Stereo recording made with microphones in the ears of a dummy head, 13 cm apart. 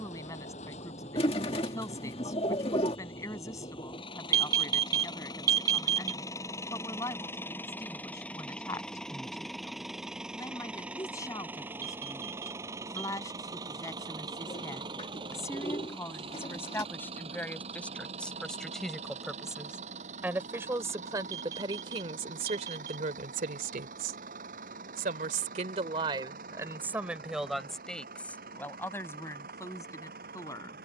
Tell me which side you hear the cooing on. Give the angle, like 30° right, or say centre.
40° left.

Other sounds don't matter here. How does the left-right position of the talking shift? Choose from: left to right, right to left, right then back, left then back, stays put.
right then back.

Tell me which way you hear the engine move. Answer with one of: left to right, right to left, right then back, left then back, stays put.
left to right.